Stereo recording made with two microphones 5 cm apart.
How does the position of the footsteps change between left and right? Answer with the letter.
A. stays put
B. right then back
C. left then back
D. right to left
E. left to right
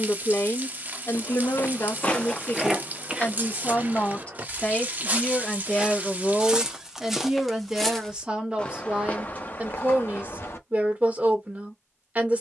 B.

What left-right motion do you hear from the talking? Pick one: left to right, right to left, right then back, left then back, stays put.
left to right.